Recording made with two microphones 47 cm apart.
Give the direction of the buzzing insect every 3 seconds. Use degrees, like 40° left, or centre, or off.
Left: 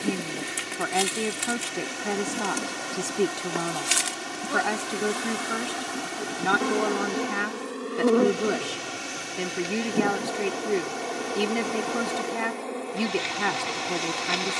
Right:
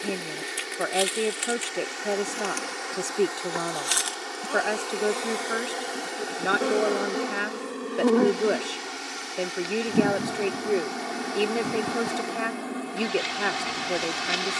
60° left, 40° left, centre, 30° right, 30° right.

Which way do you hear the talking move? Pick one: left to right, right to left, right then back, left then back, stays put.
stays put.